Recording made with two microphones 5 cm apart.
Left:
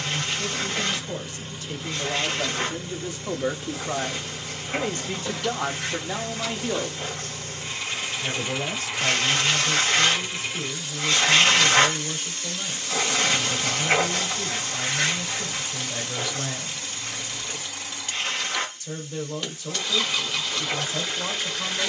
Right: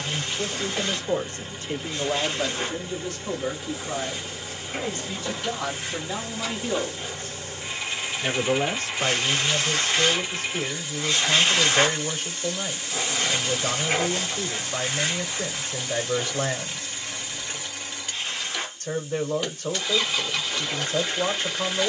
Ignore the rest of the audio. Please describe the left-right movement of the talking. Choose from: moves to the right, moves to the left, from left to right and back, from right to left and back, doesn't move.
from right to left and back.